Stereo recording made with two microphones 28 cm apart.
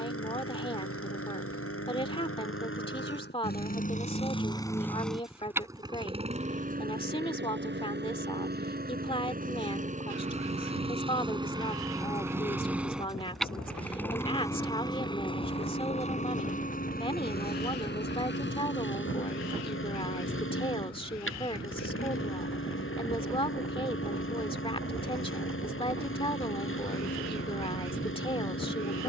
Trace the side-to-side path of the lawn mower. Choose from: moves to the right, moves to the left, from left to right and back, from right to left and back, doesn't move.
from left to right and back.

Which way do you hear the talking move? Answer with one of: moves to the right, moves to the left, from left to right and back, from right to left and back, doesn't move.
doesn't move.